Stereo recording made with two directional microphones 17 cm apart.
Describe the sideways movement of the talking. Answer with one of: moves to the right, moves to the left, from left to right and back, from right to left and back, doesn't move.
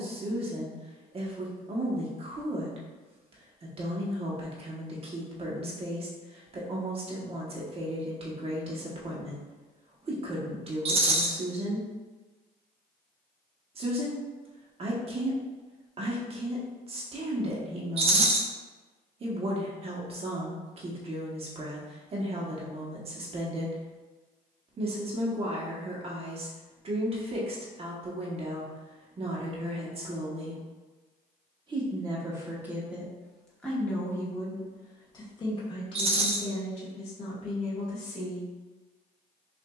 moves to the left.